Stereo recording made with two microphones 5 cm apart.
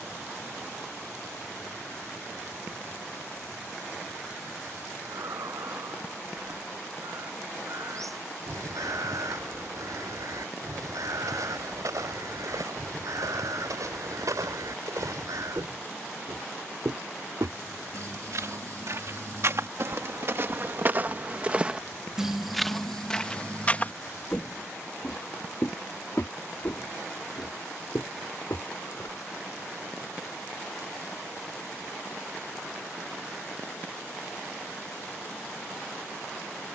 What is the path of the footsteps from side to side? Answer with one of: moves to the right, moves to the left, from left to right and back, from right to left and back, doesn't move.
moves to the left.